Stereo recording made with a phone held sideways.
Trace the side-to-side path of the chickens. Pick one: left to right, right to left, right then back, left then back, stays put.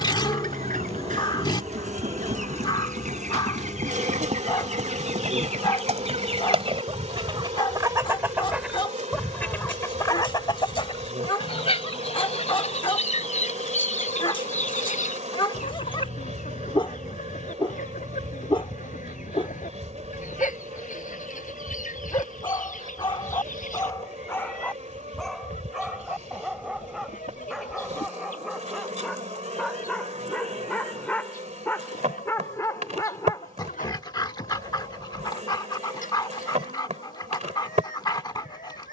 right to left.